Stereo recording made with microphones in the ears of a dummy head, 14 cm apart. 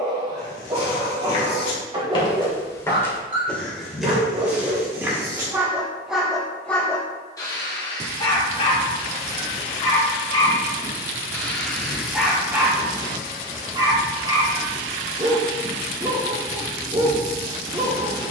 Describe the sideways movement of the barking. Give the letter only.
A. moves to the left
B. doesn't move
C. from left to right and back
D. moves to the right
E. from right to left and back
E.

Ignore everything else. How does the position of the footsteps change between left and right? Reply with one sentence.
You can hear the footsteps move to the right.